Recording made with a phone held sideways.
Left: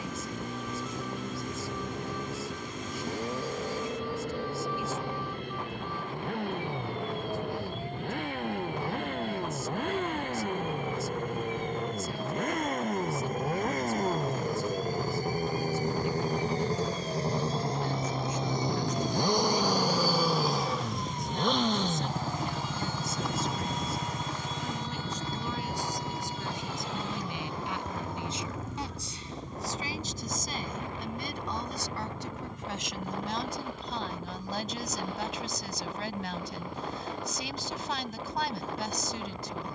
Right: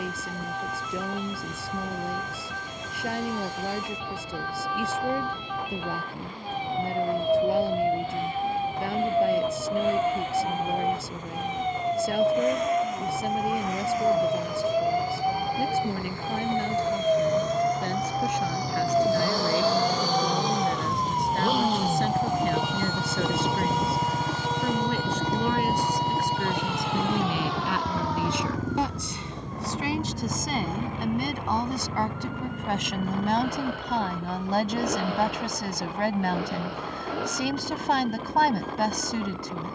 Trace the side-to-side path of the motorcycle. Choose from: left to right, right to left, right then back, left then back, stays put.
left to right.